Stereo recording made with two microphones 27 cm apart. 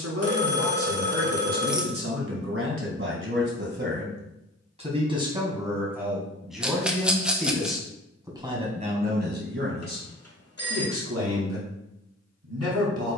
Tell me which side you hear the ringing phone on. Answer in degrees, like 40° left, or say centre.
60° left.